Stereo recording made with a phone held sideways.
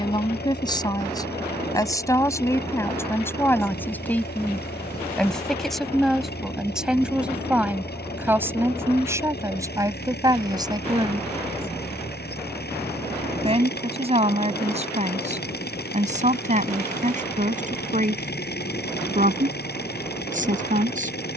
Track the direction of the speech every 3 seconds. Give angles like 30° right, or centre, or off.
20° left, 10° left, 10° right, 20° right, 40° right, 50° right, 50° right.